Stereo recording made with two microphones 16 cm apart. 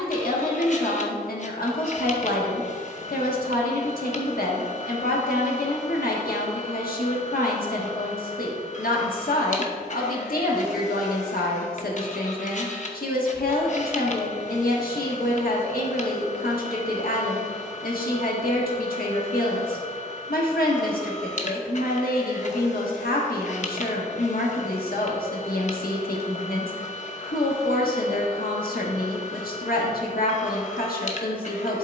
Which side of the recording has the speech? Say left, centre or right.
left.